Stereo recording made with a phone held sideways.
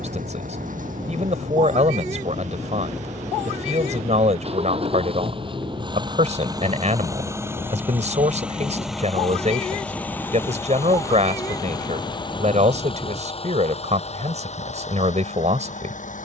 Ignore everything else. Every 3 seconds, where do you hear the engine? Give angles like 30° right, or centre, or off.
50° right, 40° right, 10° right, 10° left, 40° left, 50° left.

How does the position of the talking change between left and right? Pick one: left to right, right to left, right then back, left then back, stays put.
stays put.